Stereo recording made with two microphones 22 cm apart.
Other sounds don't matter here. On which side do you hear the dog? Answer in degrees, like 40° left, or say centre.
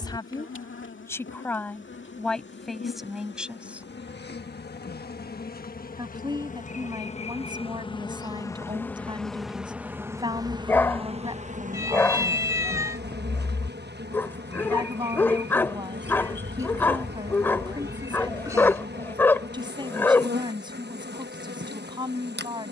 10° left.